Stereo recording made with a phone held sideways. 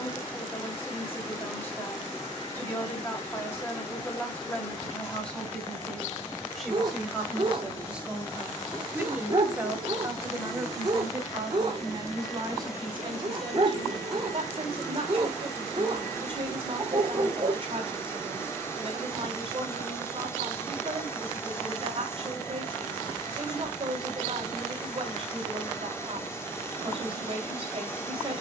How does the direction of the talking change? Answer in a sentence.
In this clip you hear the talking move to the right.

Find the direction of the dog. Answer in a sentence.
In this clip you hear the dog on the right.